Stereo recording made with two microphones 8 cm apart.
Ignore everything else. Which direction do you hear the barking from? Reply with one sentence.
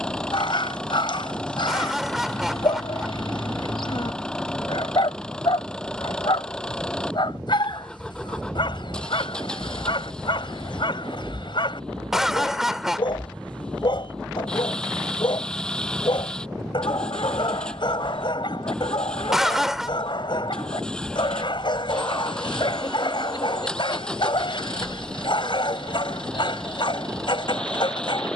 In this clip you hear the barking on the left.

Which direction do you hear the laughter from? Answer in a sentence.
In this clip you hear the laughter in the centre.